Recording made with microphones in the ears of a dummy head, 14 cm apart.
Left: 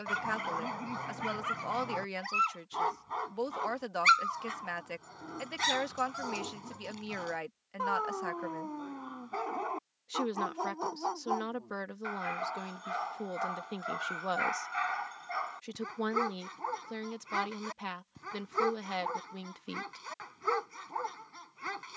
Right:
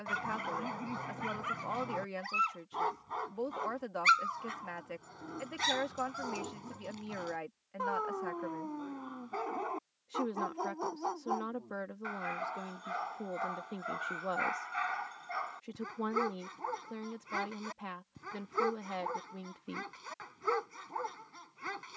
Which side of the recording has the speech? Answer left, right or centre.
left.